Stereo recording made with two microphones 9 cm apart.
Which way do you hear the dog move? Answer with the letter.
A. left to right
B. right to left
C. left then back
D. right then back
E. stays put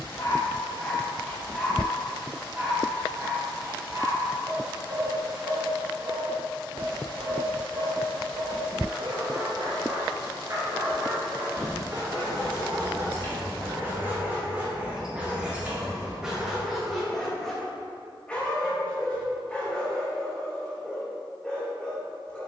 D.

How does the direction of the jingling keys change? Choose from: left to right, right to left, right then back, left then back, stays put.
left to right.